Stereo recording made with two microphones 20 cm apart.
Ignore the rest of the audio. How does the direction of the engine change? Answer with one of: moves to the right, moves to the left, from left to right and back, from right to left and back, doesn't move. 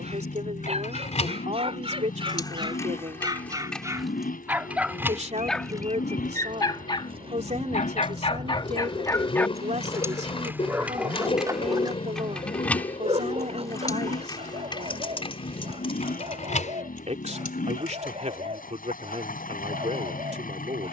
doesn't move.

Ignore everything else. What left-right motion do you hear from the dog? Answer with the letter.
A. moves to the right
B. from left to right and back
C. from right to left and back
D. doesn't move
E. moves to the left
C.